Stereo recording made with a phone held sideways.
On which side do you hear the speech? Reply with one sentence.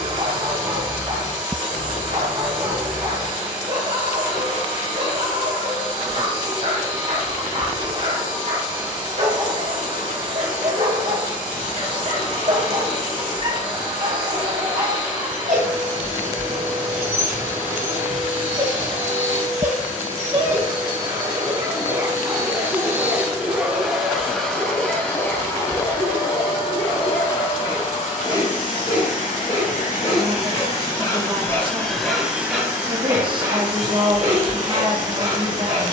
You can hear the speech on the right.